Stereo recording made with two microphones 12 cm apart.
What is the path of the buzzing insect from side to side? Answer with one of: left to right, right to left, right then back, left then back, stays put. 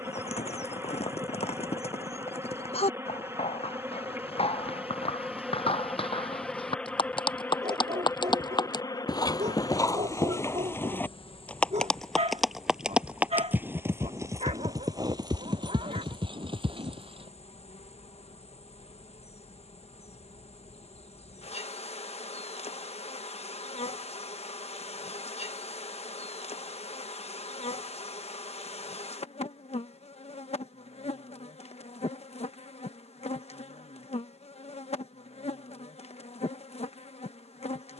right to left.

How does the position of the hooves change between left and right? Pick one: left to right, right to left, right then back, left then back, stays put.
left to right.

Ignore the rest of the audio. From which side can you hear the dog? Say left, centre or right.
right.